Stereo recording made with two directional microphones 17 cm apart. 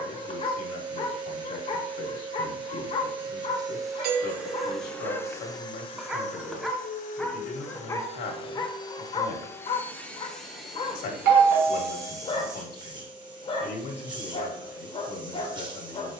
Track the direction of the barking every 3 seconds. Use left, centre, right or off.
left, left, centre, left, left, left.